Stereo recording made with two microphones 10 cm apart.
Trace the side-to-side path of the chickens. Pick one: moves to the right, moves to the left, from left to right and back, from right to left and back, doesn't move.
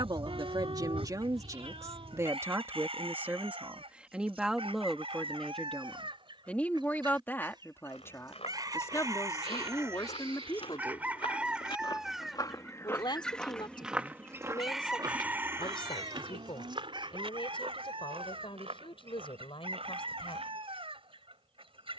from right to left and back.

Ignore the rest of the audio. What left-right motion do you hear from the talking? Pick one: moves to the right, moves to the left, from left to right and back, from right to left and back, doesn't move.
moves to the left.